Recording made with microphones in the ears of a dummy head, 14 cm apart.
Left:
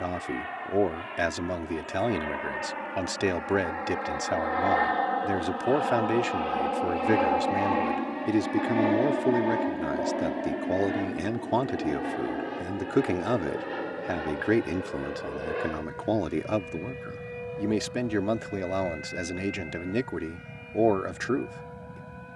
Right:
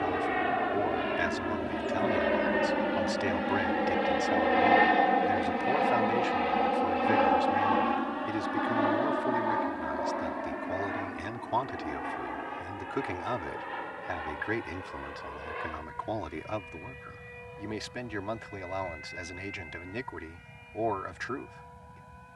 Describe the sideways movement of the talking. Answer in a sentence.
You can hear the talking stay put.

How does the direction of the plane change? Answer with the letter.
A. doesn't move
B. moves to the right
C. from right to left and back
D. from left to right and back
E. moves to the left
E.